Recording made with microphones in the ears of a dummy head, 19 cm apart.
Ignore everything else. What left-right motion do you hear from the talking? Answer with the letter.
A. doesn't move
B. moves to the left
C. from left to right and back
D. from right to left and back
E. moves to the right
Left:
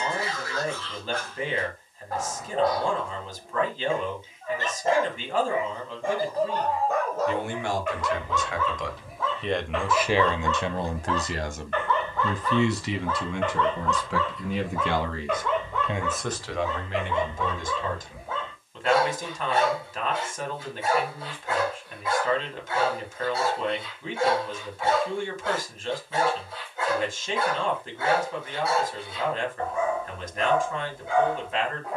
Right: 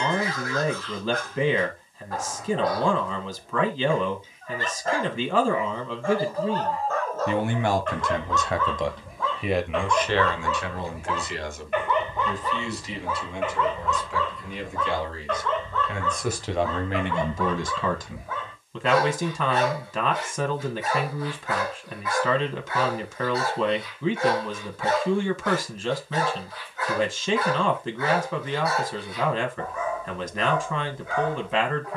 D.